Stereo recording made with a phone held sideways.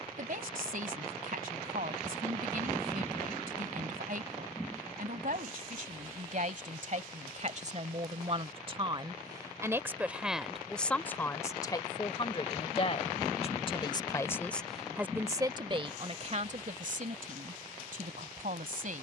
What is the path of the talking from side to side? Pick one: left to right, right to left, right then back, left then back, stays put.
left then back.